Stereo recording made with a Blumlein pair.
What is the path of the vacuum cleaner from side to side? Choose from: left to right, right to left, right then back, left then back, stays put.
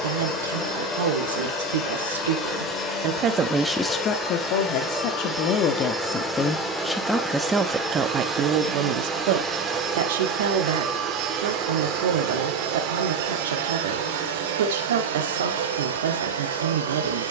left to right.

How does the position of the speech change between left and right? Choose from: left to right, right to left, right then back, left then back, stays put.
left then back.